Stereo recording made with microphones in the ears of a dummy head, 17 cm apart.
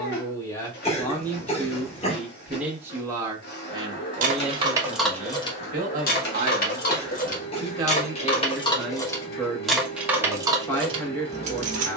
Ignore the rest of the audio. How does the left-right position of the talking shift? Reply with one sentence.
You can hear the talking go right and come back.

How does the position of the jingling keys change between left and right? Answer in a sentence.
In this clip you hear the jingling keys move from right to left and back again.